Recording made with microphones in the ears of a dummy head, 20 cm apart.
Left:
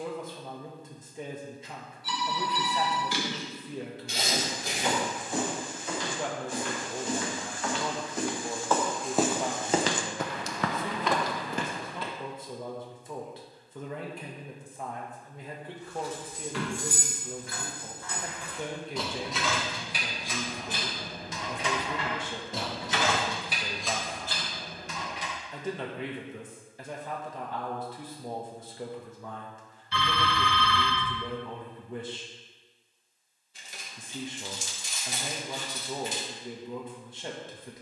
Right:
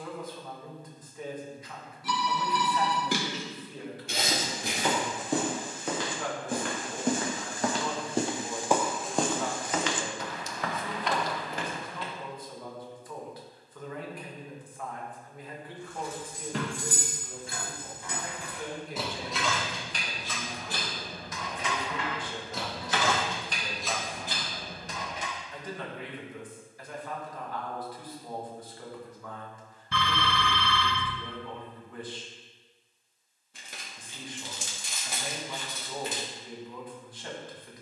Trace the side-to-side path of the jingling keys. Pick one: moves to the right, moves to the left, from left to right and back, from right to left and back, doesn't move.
from right to left and back.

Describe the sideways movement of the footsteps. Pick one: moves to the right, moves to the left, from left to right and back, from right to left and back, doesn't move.
moves to the left.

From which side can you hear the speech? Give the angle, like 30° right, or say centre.
20° left.